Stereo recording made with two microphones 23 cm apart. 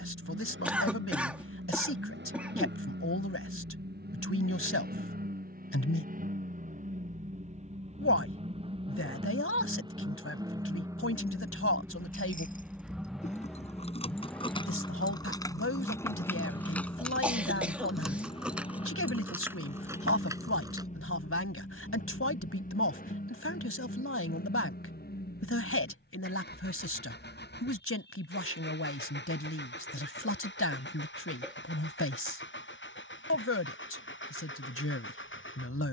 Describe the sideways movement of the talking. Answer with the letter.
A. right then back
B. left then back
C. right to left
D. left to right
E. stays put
E.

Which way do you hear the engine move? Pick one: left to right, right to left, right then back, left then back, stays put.
right to left.